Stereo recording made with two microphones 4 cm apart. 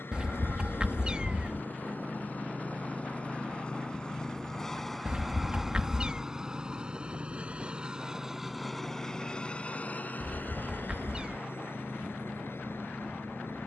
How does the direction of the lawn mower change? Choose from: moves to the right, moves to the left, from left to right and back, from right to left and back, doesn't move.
from left to right and back.